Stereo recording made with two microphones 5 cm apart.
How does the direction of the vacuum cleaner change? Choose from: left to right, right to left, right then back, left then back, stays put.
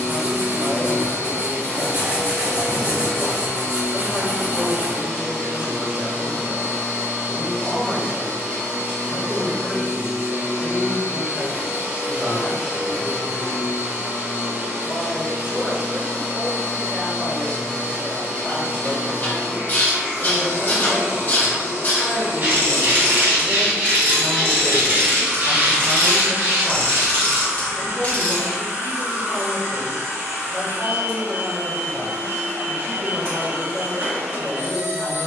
stays put.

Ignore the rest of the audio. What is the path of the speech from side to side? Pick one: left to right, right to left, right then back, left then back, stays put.
right then back.